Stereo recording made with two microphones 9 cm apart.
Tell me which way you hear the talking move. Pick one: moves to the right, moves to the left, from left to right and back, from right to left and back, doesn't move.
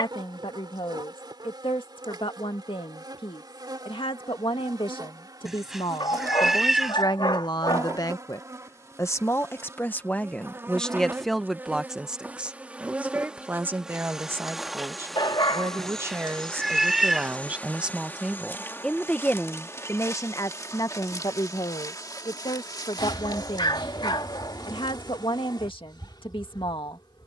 from left to right and back.